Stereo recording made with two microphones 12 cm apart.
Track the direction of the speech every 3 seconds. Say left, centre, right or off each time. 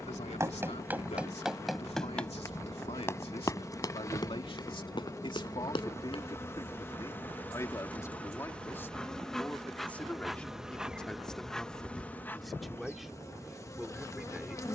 left, left, left, centre, centre.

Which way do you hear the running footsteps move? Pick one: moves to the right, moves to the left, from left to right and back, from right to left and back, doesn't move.
moves to the left.